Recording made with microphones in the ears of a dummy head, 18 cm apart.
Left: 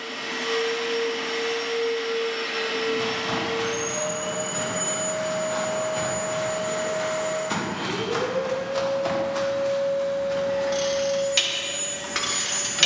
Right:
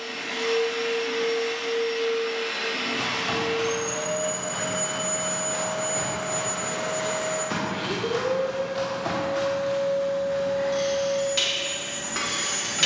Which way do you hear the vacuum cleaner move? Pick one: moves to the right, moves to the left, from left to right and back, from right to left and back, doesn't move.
doesn't move.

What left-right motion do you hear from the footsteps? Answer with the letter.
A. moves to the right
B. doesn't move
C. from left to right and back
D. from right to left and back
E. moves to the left
E.